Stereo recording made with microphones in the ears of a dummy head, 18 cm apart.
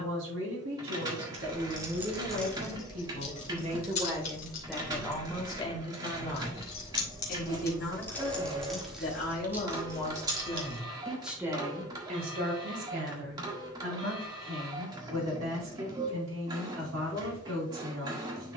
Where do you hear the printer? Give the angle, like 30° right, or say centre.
20° right.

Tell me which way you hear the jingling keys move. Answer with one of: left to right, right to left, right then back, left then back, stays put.
left then back.